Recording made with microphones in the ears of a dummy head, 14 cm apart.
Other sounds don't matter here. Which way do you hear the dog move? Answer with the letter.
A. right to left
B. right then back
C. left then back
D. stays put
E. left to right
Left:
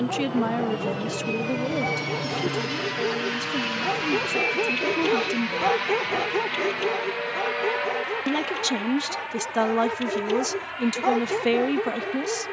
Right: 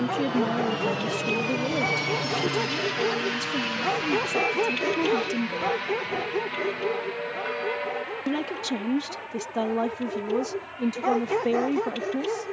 C.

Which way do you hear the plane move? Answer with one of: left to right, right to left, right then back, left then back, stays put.
right to left.